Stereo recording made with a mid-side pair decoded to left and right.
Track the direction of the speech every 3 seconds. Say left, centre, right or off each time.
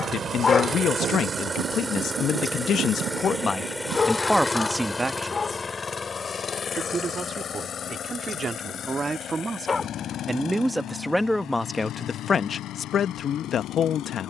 left, centre, right, centre, left.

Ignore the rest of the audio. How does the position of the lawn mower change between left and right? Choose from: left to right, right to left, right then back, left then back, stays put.
right to left.